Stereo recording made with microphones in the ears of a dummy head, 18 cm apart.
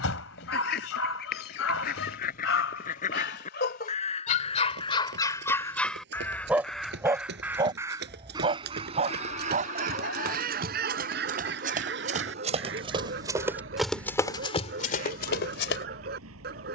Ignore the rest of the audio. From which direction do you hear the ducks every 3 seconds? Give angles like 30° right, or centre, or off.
50° left, 30° left, 10° right, 50° right, 70° right, 70° right.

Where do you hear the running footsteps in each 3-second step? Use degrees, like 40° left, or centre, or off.
off, 60° right, 60° right, 50° right, 10° right, 60° left.